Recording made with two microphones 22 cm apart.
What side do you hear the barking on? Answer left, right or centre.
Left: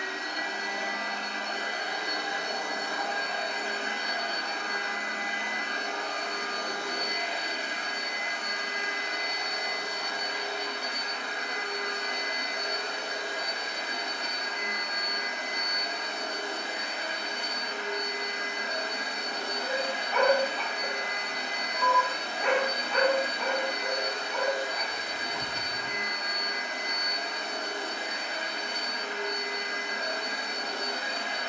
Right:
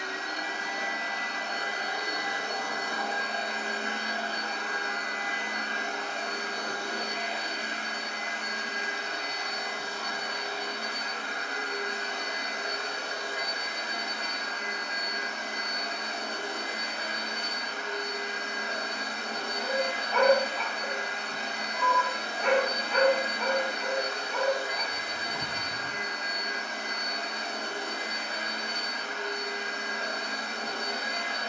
centre.